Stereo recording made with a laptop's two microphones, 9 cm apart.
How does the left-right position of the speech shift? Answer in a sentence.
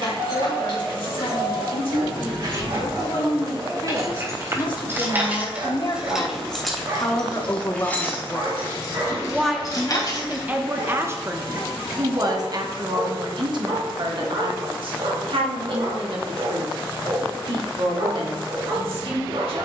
You can hear the speech move to the right.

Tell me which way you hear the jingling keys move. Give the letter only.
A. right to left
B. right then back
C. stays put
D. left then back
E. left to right
A.